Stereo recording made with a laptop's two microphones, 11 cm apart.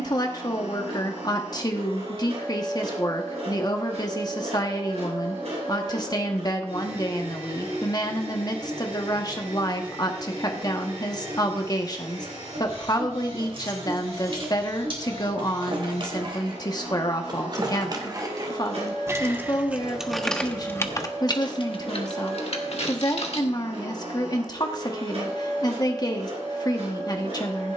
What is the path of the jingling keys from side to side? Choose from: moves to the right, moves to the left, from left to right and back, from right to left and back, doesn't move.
moves to the left.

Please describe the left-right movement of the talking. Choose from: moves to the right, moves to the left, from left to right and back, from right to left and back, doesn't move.
doesn't move.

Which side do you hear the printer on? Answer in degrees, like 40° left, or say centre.
80° right.